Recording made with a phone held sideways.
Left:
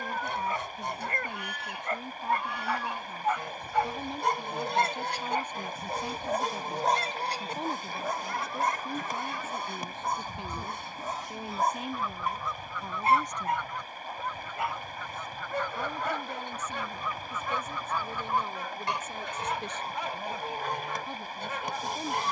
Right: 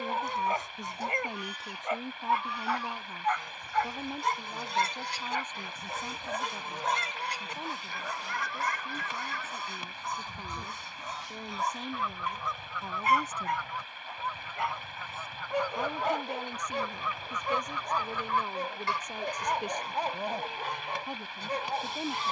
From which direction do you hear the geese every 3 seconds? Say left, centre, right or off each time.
left, left, left, centre, centre, centre, left, left.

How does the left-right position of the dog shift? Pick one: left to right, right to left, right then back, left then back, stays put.
left then back.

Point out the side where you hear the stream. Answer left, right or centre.
left.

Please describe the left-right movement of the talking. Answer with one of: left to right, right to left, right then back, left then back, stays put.
left then back.